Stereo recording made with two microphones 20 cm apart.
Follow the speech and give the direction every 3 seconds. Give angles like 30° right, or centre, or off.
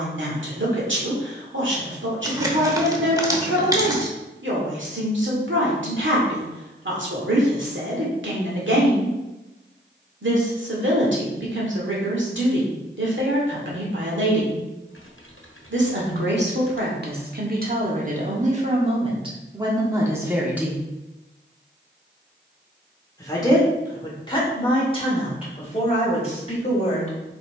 70° right, 70° right, 70° right, 70° right, 70° right, 50° right, 20° right, 20° left, 30° left.